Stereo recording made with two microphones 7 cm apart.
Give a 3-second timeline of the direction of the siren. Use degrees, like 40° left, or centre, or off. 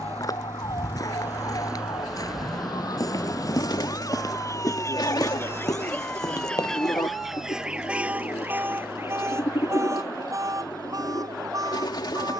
70° left, 40° left, 10° right, 40° right.